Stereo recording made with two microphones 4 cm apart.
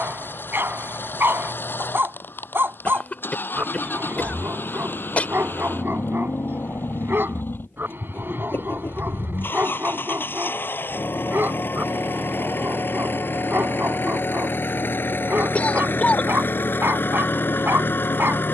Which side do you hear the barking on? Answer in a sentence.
You can hear the barking on the right.